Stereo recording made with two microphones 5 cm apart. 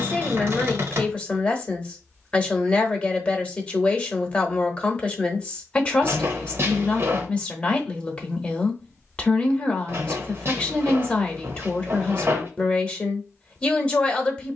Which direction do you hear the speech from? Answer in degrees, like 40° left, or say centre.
20° left.